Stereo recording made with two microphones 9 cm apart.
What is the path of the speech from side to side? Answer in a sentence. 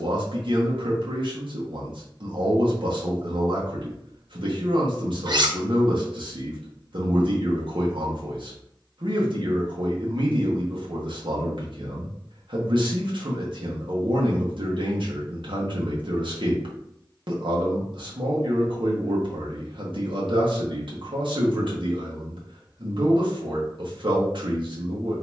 In this clip you hear the speech stay put.